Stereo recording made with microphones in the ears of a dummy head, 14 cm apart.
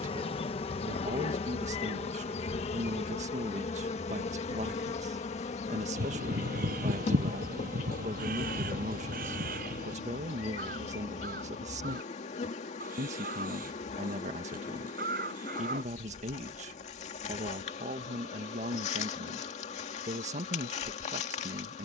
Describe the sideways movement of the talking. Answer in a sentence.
You can hear the talking stay put.